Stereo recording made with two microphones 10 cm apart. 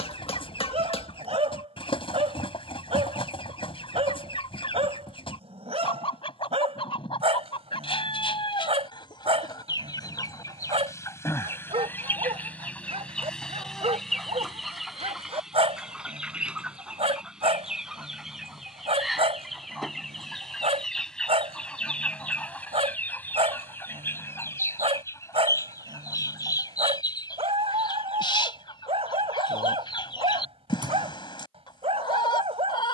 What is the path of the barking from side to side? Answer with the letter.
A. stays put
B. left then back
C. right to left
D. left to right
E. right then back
A.